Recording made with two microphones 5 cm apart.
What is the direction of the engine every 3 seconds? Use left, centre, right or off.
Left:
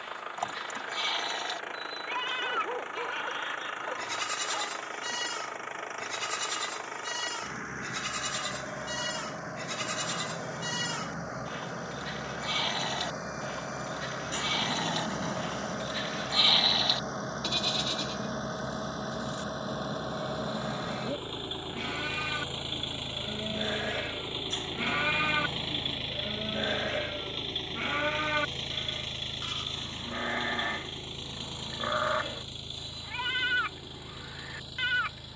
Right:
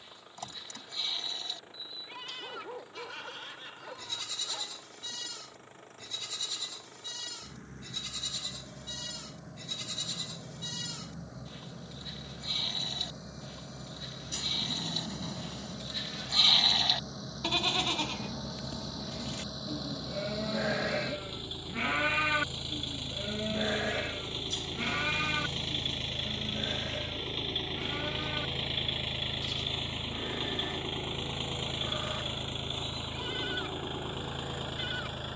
left, left, left, left, left, left, left, left, centre, centre, right, right.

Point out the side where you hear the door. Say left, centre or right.
left.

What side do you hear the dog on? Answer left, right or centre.
left.